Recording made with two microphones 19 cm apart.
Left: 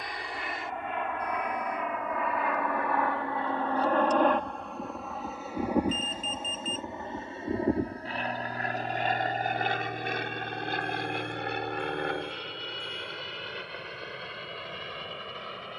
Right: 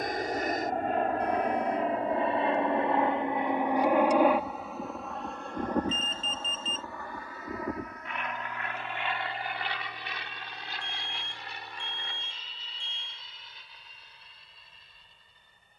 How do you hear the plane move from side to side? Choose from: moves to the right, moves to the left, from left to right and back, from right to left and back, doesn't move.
moves to the left.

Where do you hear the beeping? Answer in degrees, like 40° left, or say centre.
30° right.